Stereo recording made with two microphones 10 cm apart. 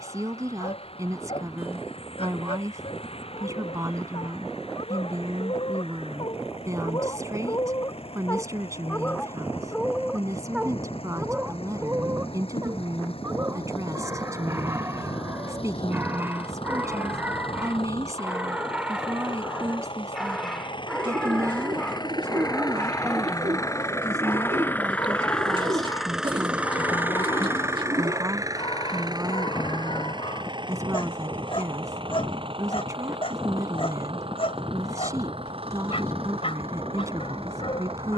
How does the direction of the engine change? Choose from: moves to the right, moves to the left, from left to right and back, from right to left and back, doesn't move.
moves to the right.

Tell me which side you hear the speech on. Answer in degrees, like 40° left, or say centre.
30° right.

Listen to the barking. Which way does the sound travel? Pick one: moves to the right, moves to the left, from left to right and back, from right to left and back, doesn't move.
from left to right and back.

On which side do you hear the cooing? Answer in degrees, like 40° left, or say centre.
60° right.